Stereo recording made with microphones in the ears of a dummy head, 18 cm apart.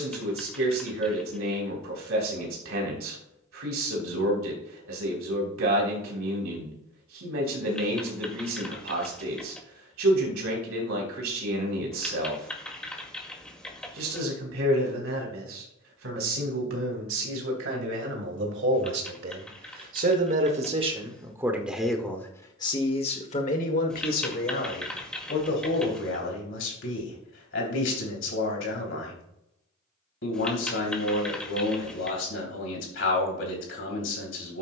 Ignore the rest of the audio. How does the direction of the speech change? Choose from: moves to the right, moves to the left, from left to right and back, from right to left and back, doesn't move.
moves to the left.